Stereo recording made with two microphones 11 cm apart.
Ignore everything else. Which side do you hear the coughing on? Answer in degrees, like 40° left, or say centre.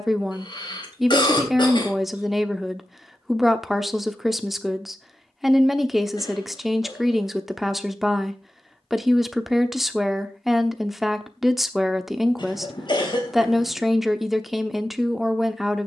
50° left.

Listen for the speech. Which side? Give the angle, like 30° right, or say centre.
centre.